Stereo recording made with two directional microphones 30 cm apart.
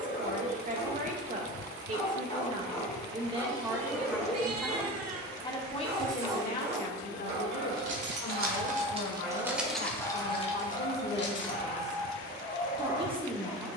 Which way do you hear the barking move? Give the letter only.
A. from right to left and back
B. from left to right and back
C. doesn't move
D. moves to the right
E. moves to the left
B.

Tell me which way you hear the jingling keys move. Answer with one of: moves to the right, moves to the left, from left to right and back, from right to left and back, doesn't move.
moves to the left.